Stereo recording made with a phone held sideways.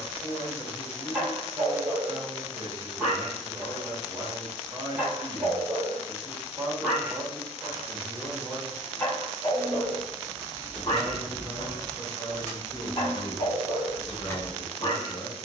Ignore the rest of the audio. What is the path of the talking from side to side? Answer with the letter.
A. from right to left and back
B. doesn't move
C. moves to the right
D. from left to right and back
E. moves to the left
E.